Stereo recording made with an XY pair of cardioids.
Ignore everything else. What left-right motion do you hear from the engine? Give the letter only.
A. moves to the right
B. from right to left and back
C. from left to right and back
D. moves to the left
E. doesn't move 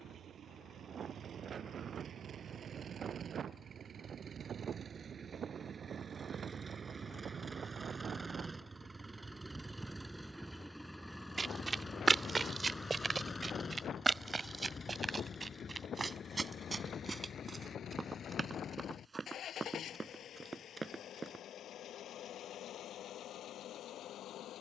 D.